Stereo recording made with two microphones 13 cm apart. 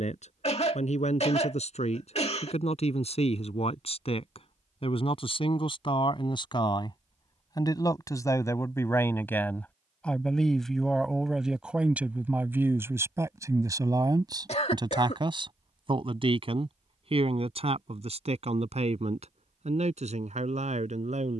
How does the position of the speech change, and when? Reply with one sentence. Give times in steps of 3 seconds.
In this clip you hear the speech on the left from 0 s, in the centre from 9 s and on the right from 12 s.